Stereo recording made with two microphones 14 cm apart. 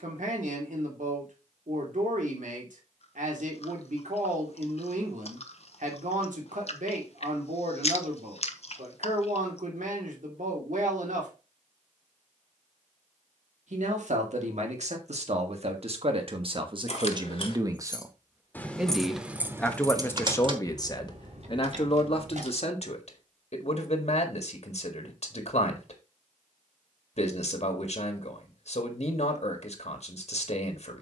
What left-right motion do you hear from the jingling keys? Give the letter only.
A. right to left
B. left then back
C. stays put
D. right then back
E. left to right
E.